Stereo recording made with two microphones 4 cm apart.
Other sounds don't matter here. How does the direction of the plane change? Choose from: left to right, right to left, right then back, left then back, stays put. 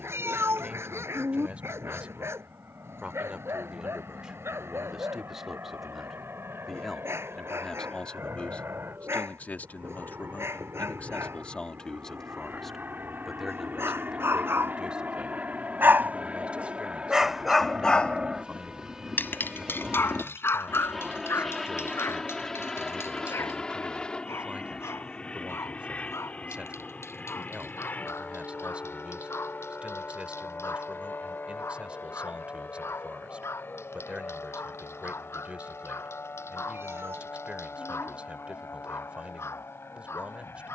right to left.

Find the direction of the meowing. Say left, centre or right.
right.